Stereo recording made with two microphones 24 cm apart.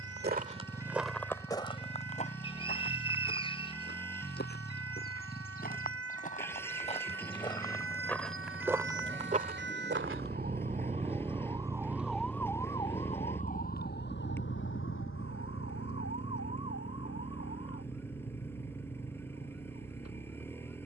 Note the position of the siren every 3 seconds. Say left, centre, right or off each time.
right, right, right, right, left, left, left.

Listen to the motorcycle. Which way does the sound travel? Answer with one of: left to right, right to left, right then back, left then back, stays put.
stays put.